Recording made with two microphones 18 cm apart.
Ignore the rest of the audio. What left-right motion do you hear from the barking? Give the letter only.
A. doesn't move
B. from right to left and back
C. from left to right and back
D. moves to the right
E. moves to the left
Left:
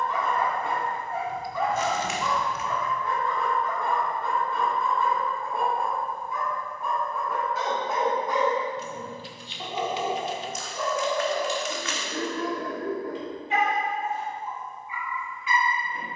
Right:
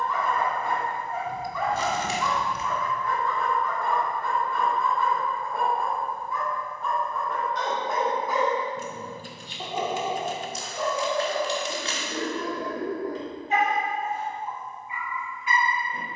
D.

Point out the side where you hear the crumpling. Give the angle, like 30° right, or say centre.
30° right.